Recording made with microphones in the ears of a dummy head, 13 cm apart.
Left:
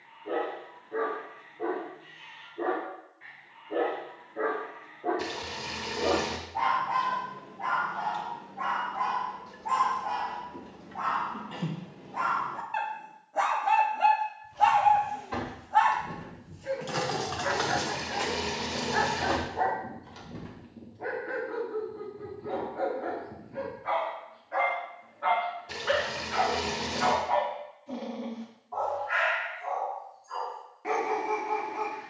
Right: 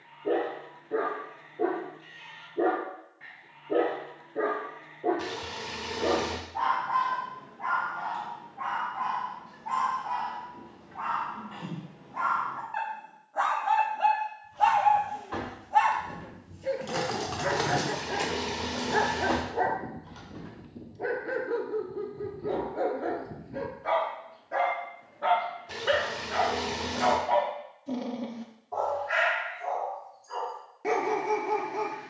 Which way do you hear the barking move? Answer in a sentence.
In this clip you hear the barking go left and come back.